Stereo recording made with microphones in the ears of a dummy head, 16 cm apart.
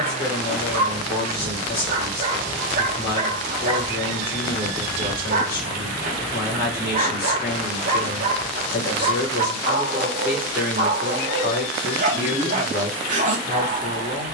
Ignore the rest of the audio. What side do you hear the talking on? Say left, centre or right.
left.